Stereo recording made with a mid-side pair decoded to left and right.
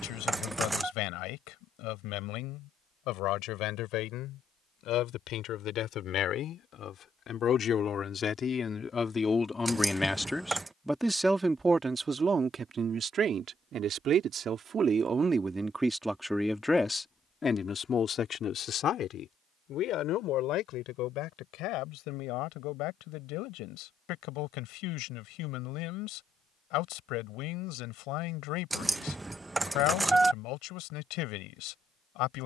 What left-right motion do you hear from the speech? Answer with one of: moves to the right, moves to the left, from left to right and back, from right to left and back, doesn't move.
from left to right and back.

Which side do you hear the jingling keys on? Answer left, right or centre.
centre.